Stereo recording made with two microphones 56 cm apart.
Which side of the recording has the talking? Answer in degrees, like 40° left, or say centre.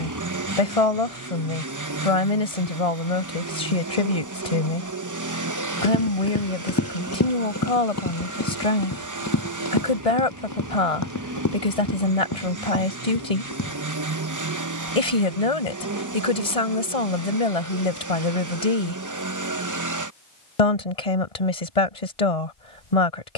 80° left.